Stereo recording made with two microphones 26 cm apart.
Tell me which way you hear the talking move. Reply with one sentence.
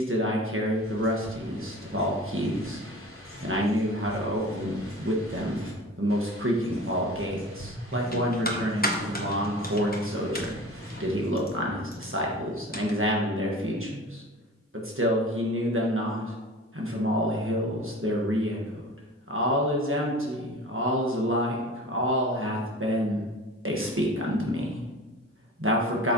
In this clip you hear the talking stay in one place.